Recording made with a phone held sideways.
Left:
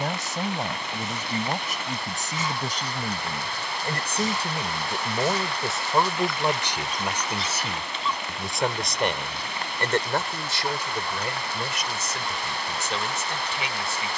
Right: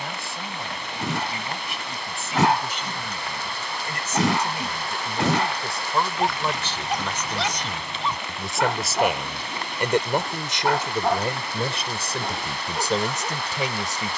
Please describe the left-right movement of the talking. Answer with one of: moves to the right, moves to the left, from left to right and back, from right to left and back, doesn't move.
moves to the right.